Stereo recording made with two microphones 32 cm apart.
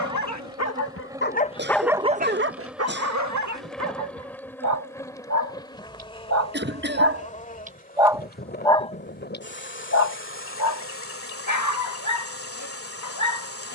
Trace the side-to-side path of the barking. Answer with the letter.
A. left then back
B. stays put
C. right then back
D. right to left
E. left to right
C.